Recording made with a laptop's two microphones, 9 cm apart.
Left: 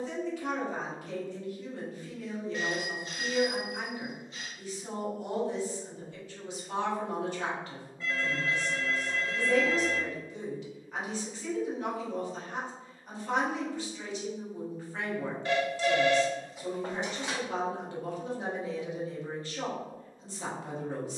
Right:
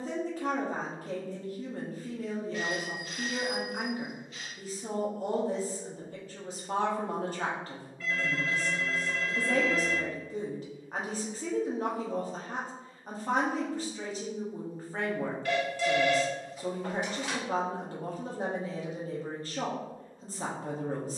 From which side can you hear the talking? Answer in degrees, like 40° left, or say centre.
40° right.